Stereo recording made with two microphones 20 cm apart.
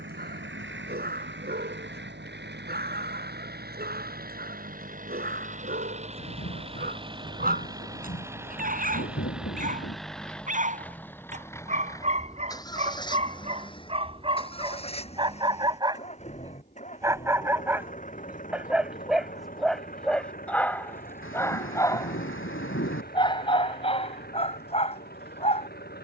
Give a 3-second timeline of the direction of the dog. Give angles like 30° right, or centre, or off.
50° right, 50° right, 50° right, 40° right, 30° right, 20° right, centre, 20° left, 30° left.